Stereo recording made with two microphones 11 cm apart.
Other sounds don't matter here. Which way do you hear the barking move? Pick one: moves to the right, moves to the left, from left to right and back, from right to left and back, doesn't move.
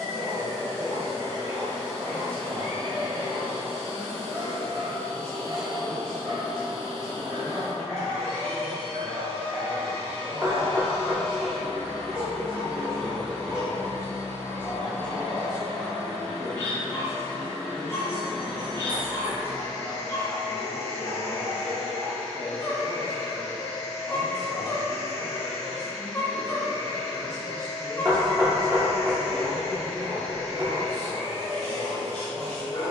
moves to the left.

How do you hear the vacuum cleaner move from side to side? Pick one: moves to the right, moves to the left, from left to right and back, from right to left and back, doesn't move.
doesn't move.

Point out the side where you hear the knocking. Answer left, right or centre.
right.